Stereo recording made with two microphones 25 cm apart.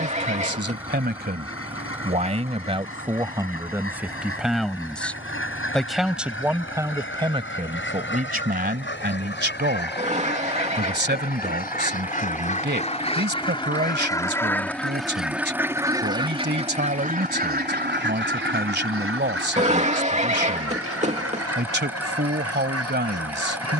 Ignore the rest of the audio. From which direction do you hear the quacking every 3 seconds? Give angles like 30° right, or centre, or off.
60° left, 60° left, 50° left, 40° left, 20° left, 20° right, 60° right, 80° right.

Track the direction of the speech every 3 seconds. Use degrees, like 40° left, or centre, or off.
40° right, centre, 20° right, 40° right, 40° right, 40° right, 40° right, 40° right.